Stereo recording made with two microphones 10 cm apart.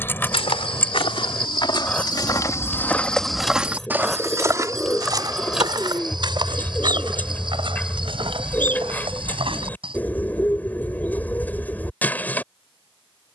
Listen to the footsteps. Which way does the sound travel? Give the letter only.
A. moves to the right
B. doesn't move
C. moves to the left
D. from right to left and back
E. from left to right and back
A.